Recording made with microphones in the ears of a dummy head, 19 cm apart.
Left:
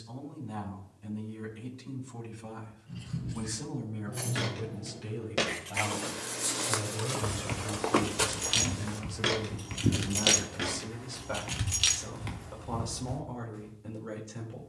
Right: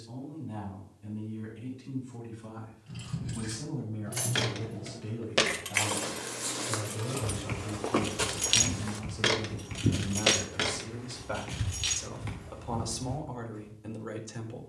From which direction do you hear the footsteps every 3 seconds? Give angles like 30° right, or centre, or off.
off, 30° right, 20° left, 40° right, off.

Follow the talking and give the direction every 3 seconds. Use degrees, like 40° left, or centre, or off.
30° left, 30° left, 20° left, centre, 20° right.